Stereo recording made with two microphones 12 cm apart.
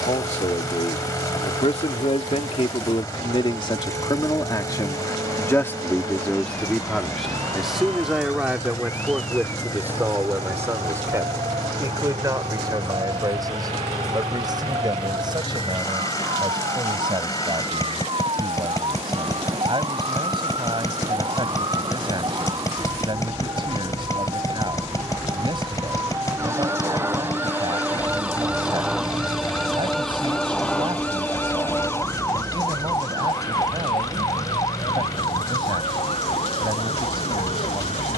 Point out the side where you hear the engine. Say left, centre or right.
left.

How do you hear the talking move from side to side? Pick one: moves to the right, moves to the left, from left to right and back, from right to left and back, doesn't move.
moves to the right.